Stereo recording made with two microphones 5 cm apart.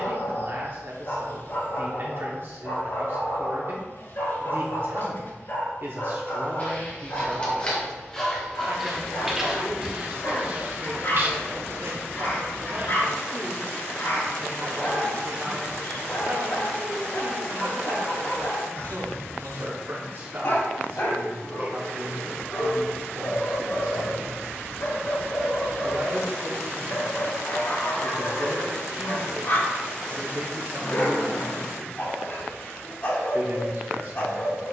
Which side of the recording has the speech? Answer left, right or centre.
right.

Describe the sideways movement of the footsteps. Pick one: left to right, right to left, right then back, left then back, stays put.
left to right.